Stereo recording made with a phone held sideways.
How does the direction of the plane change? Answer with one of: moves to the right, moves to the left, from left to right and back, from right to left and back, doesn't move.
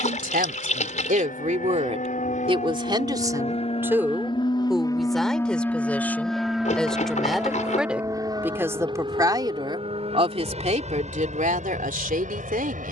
moves to the right.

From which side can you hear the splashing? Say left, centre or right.
left.